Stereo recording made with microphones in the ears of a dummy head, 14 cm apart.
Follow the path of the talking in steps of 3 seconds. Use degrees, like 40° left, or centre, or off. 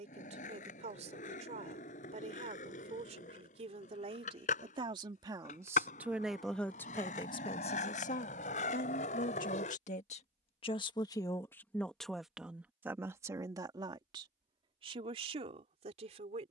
50° right, 40° right, 30° left, 40° left, 20° right, 40° right.